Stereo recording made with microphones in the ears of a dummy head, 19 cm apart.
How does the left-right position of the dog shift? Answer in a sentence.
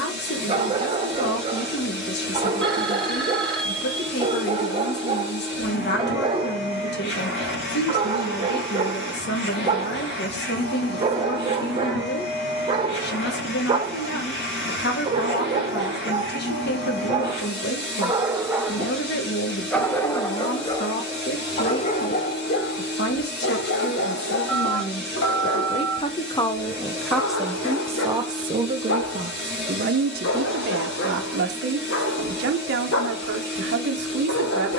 You can hear the dog go from the right side to the left.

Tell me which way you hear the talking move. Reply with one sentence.
In this clip you hear the talking move to the right.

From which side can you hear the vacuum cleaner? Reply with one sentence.
In this clip you hear the vacuum cleaner on the left.